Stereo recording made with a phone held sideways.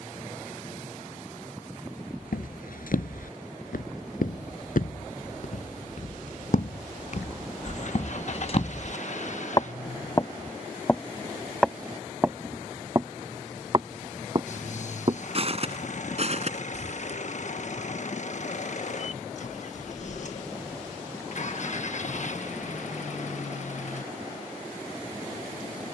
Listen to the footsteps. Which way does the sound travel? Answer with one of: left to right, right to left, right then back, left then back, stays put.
left to right.